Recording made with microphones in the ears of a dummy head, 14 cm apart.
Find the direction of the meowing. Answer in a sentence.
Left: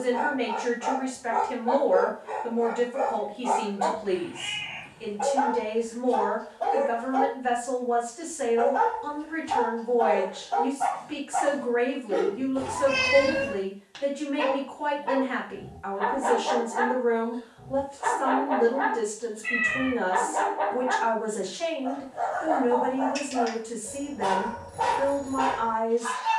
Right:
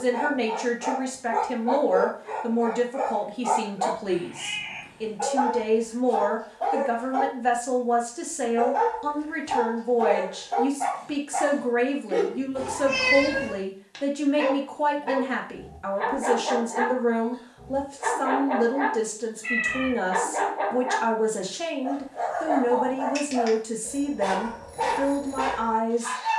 You can hear the meowing in the centre.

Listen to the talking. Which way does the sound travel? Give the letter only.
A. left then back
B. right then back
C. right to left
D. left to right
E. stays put
E.